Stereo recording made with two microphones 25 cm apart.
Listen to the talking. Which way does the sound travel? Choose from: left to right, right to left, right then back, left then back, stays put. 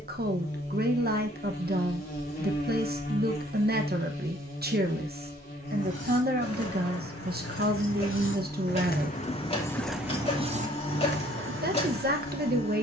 stays put.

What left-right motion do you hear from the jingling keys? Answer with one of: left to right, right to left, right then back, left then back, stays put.
left to right.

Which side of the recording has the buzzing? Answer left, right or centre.
left.